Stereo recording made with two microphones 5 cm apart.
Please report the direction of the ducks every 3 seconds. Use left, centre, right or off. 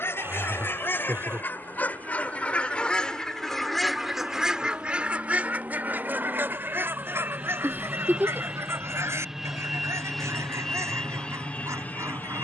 left, centre, right, right.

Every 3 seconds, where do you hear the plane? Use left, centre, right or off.
right, right, right, centre.